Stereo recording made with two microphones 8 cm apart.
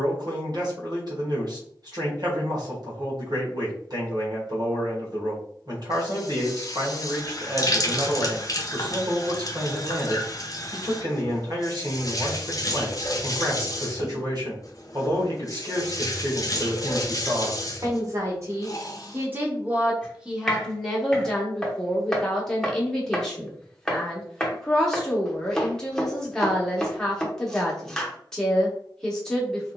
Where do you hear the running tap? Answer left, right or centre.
left.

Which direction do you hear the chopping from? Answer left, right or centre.
centre.